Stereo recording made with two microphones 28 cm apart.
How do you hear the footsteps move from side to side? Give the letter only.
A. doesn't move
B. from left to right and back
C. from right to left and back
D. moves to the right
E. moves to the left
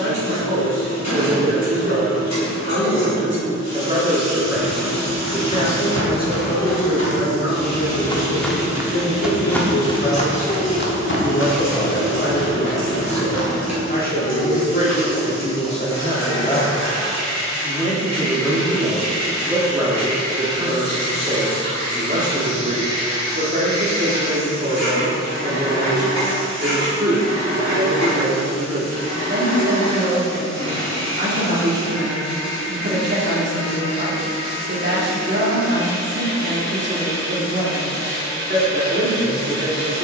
B.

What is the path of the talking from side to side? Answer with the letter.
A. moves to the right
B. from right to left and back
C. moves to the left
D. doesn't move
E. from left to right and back
B.